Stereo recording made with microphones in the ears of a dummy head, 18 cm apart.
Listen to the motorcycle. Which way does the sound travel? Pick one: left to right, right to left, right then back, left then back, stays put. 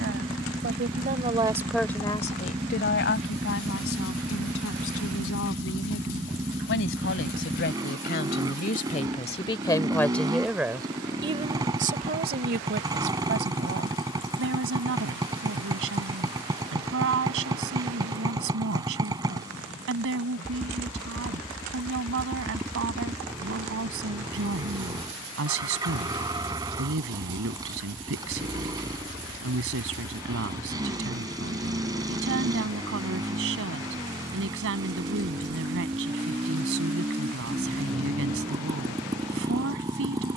stays put.